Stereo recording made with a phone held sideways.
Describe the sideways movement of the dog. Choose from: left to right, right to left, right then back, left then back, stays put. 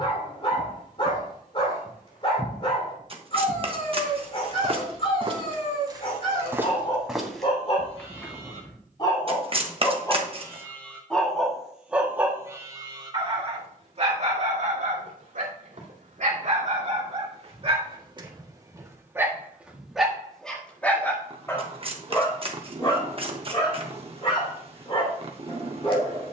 right then back.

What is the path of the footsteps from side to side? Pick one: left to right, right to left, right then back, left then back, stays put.
right then back.